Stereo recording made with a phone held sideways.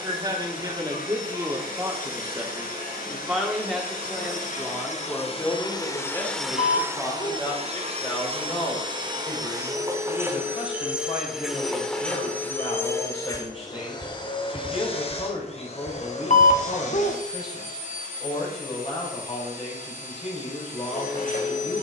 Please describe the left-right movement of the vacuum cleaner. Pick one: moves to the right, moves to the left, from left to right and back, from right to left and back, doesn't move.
from left to right and back.